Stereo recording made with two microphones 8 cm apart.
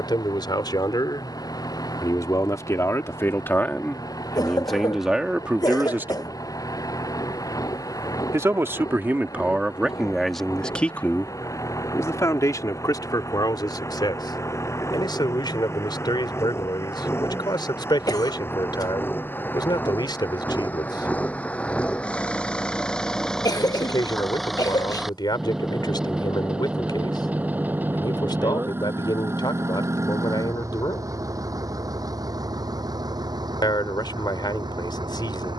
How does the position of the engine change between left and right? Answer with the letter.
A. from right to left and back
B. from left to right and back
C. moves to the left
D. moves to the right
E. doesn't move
D.